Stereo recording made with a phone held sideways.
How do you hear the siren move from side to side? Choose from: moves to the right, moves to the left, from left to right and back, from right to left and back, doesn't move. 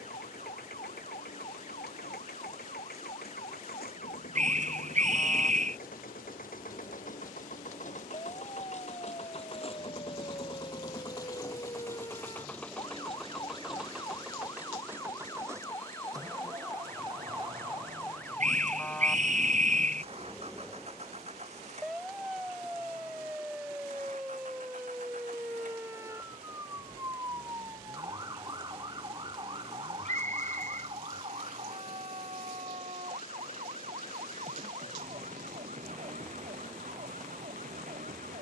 moves to the right.